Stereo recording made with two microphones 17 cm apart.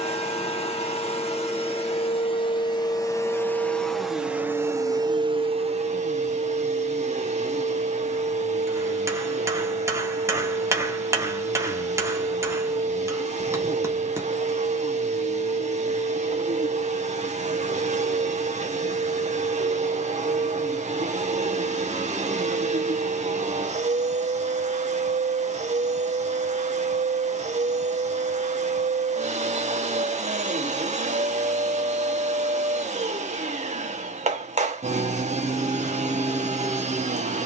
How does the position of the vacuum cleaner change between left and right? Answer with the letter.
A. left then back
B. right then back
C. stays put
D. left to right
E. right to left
D.